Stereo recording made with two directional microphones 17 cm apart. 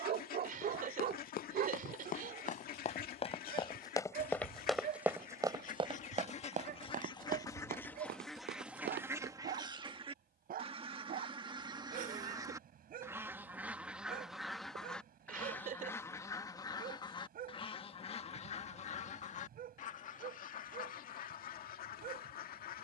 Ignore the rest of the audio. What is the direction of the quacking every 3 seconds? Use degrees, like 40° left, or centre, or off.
60° left, 50° left, 20° left, 30° right, 10° right, 20° left, 40° left, 60° left.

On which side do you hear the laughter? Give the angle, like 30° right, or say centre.
50° right.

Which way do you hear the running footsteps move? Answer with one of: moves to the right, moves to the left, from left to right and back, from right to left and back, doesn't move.
moves to the right.